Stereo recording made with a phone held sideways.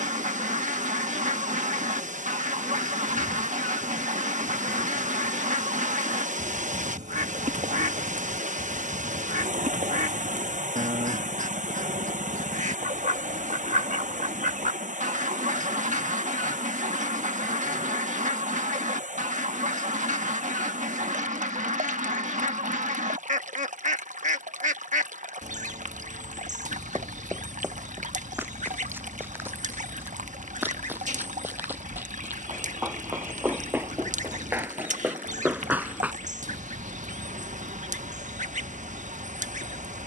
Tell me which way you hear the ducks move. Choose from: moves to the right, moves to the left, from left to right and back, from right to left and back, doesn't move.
doesn't move.